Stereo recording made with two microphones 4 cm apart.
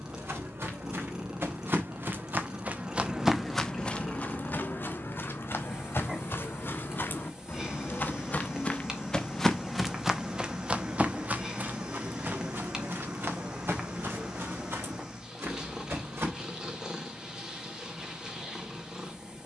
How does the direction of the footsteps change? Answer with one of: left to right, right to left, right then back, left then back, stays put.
left then back.